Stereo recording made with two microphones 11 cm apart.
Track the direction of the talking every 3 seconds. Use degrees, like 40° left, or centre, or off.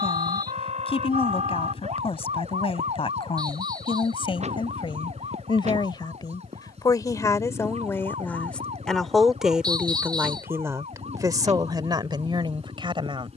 60° left, 50° left, 30° left, 20° right, 50° right.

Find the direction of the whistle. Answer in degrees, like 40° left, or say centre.
40° right.